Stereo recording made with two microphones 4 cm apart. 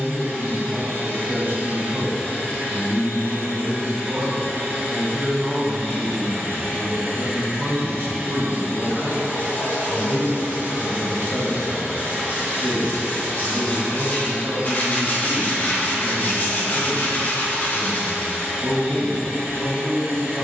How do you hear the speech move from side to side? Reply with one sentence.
In this clip you hear the speech stay in one place.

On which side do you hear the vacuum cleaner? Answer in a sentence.
In this clip you hear the vacuum cleaner on the right.